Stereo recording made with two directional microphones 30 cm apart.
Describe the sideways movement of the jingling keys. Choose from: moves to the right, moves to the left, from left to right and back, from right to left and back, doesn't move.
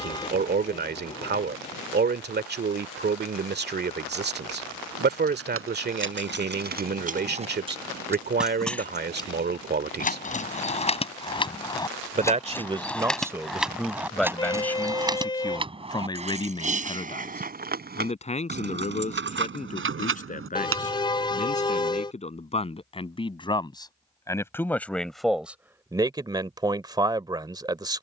from right to left and back.